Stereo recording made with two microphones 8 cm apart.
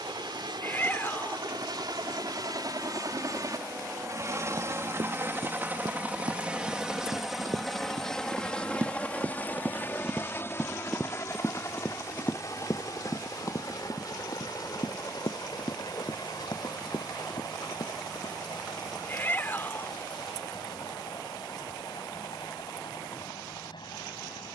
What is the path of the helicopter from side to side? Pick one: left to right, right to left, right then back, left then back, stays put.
right to left.